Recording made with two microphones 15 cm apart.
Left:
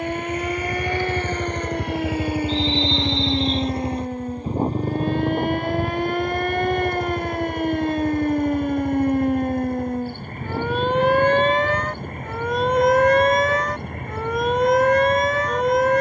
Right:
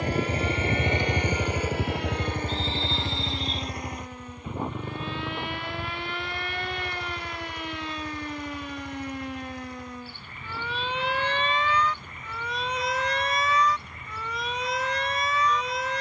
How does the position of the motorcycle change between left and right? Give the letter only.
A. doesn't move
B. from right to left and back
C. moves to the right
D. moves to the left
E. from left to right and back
D.